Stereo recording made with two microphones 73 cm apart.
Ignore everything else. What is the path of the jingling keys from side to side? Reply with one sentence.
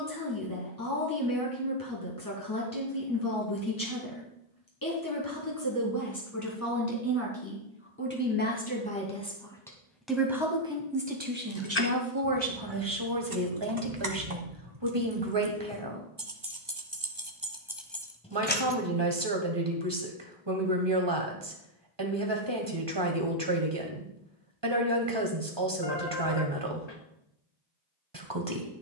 In this clip you hear the jingling keys move from left to right and back again.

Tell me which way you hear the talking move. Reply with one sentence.
You can hear the talking move to the right.